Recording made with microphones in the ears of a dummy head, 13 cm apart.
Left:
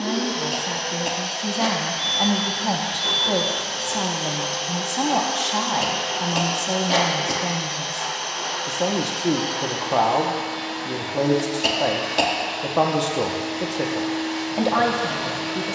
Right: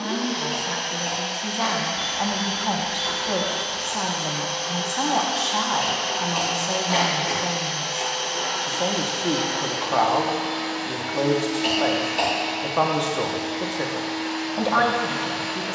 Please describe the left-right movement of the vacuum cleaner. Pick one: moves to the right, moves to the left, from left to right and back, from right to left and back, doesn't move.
from left to right and back.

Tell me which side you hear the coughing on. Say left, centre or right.
left.